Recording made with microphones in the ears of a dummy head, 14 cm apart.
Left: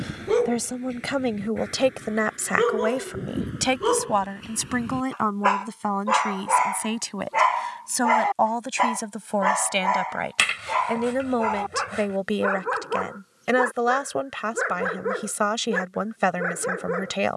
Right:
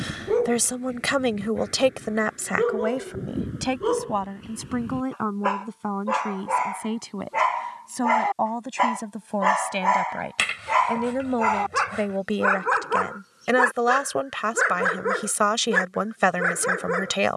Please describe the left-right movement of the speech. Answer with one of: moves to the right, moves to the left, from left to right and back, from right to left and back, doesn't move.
from right to left and back.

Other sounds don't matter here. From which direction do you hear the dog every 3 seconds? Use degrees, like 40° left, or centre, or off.
50° left, 40° left, 10° left, 30° right, 50° right, 60° right.